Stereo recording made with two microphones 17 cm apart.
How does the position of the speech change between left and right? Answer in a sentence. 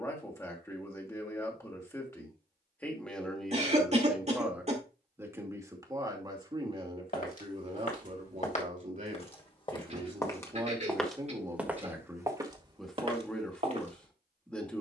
In this clip you hear the speech move from left to right and back again.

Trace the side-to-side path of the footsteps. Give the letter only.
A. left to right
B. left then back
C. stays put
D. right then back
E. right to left
A.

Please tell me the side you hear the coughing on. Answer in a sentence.
You can hear the coughing on the right.